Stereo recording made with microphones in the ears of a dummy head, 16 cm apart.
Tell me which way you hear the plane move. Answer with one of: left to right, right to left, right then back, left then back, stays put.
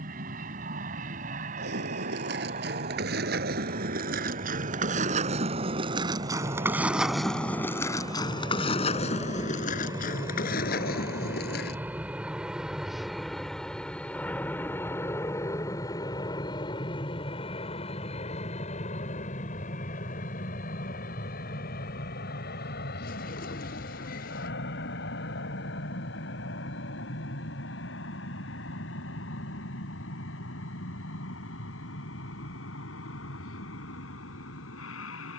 right to left.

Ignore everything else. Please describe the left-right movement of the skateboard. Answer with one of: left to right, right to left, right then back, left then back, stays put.
right to left.